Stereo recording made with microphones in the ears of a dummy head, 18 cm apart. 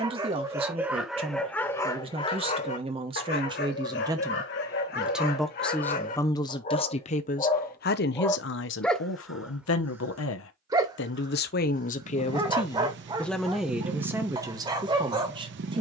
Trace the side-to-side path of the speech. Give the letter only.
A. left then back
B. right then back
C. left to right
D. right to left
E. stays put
A.